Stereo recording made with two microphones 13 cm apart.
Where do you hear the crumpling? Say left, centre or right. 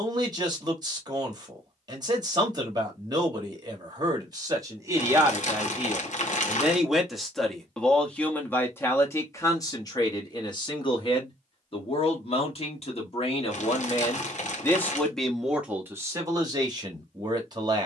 left.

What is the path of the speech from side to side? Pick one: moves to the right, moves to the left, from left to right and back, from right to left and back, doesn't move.
from right to left and back.